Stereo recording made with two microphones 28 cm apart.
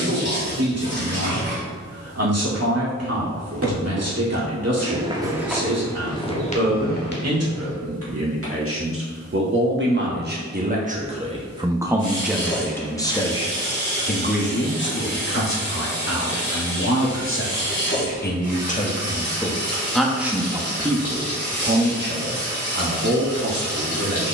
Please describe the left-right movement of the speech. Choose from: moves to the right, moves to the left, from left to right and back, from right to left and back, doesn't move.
from right to left and back.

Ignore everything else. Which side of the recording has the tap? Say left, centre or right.
left.